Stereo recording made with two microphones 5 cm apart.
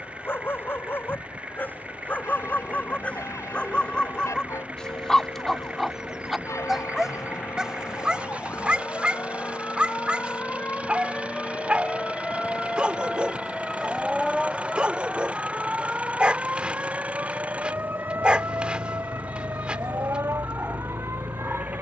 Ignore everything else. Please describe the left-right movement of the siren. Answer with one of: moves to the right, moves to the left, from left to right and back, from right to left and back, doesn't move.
moves to the right.